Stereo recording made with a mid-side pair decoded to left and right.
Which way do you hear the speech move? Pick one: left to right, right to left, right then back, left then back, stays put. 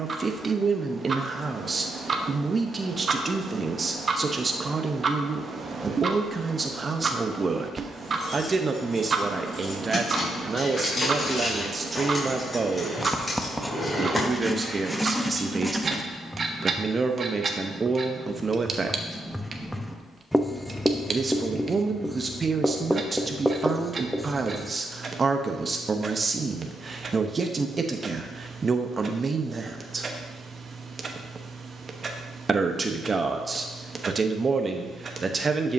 stays put.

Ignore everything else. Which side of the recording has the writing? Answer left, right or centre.
centre.